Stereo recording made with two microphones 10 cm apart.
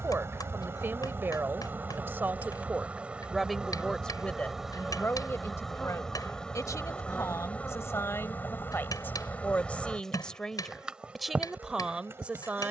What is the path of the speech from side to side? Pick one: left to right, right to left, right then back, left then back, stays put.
left then back.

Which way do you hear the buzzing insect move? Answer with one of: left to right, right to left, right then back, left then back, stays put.
left then back.